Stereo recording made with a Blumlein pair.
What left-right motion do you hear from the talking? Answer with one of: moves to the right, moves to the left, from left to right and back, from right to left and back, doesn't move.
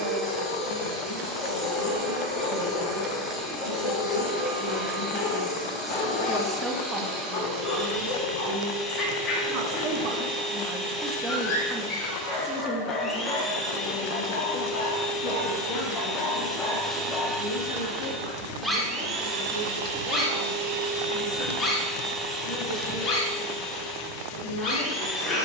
from left to right and back.